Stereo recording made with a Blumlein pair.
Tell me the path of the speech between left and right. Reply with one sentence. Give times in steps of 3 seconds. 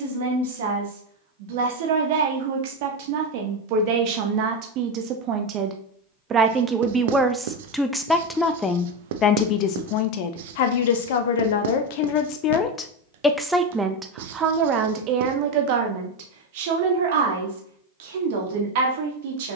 In this clip you hear the speech on the right from 0 s, in the centre from 6 s, on the left from 9 s, in the centre from 12 s and on the right from 15 s.